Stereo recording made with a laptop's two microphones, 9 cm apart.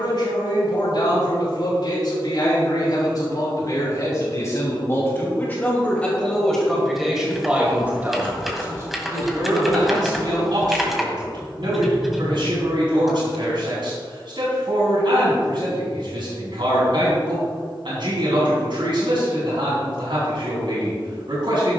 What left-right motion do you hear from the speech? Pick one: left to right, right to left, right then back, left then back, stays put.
left to right.